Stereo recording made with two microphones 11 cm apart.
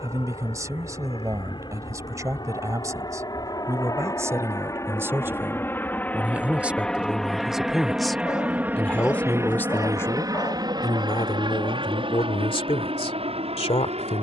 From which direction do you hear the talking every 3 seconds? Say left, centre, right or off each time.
right, right, centre, left, left.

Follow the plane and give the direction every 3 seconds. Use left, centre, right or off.
left, left, centre, right, right.